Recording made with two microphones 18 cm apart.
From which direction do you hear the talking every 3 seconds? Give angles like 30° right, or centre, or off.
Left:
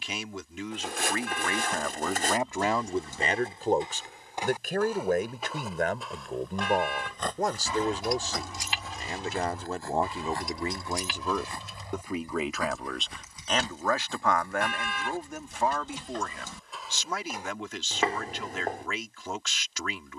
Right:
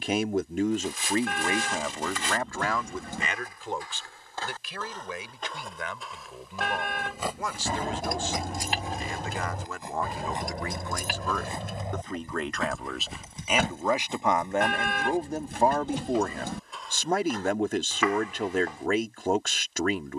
20° right, 50° left, 40° left, 30° left, 10° right, 40° right, 50° right.